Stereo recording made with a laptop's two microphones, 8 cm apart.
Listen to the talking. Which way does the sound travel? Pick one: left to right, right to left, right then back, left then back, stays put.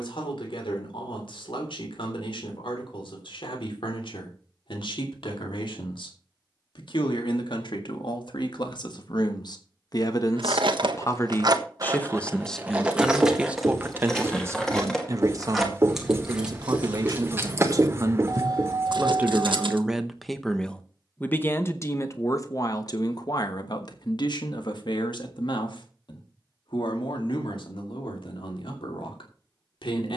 right then back.